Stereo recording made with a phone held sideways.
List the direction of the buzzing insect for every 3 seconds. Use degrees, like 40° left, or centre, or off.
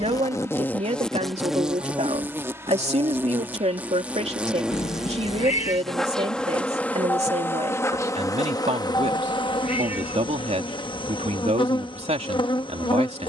centre, 10° right, 10° left, 30° left, 30° left.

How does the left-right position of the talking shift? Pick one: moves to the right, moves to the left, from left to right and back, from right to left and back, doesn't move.
doesn't move.